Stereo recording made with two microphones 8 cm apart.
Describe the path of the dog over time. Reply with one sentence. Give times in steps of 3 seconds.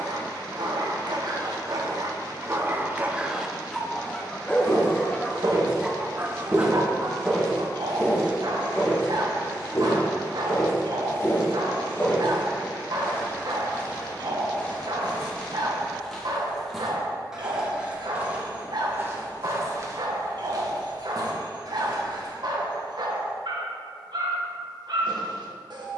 In this clip you hear the dog on the right from 0 s, in the centre from 3 s and on the right from 6 s.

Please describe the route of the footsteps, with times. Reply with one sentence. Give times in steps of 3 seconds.
You can hear the footsteps not at all from 0 s, on the right from 3 s, in the centre from 6 s, on the left from 9 s, in the centre from 15 s, on the right from 18 s and not at all from 24 s.